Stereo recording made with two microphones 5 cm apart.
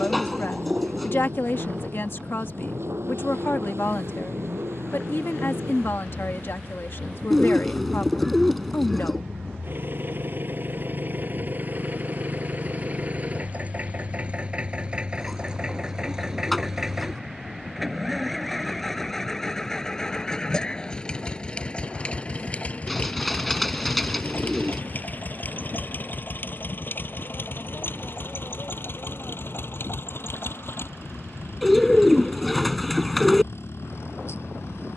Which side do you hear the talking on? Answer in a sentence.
In this clip you hear the talking on the left.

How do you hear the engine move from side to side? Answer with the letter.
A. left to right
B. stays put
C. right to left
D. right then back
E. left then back
C.